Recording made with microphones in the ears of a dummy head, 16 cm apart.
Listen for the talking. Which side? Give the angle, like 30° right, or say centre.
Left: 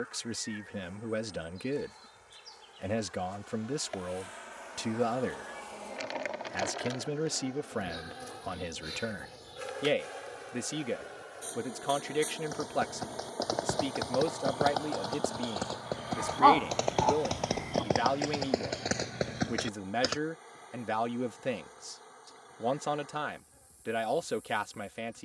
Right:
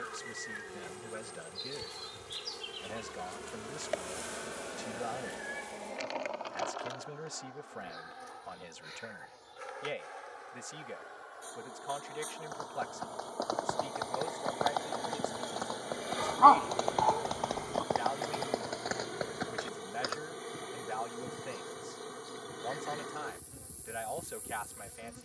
70° left.